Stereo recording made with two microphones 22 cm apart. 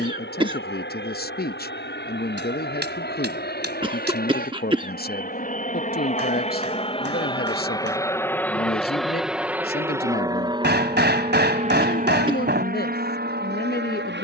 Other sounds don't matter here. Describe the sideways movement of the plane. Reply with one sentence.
In this clip you hear the plane move to the right.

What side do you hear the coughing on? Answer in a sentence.
In this clip you hear the coughing on the right.